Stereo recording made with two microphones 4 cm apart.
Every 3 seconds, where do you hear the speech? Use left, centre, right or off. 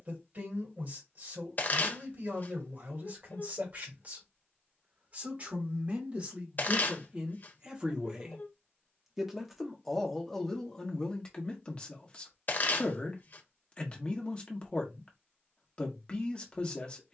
right, right, right, centre, left, left.